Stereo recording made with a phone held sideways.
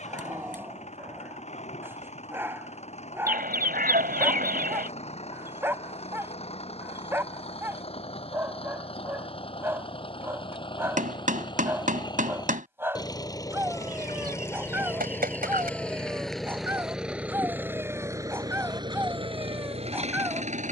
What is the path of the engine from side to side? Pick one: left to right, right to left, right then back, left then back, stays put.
left to right.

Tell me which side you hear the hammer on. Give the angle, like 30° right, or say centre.
60° right.